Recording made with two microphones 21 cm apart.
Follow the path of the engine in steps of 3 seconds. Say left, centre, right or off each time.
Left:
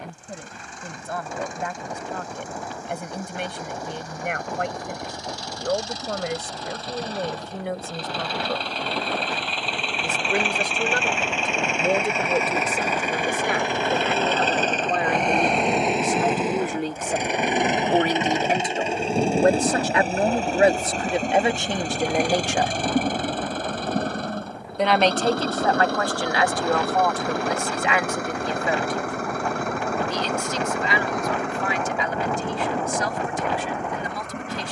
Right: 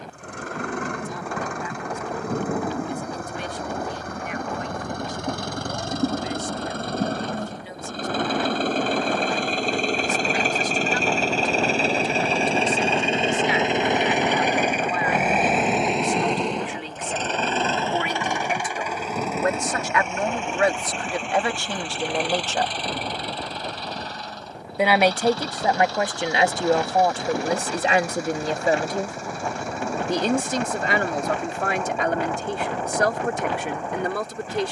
right, right, right, right, right, centre, left, left, left, left, left, left.